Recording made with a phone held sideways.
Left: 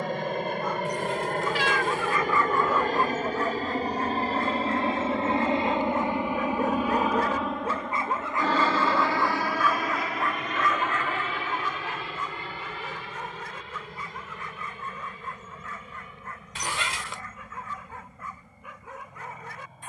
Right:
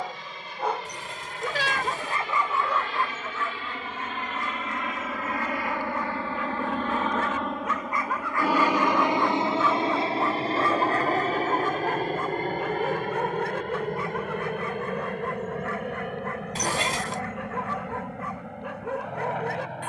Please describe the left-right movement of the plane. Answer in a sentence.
In this clip you hear the plane move from left to right.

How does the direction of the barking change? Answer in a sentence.
You can hear the barking move from right to left and back again.